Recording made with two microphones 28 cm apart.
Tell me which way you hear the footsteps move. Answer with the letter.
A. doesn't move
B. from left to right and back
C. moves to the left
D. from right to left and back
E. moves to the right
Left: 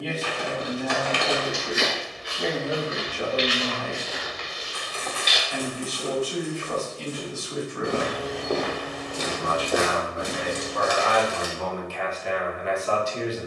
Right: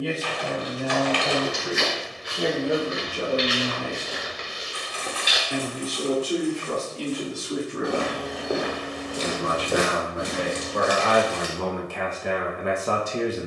D.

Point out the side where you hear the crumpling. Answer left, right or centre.
left.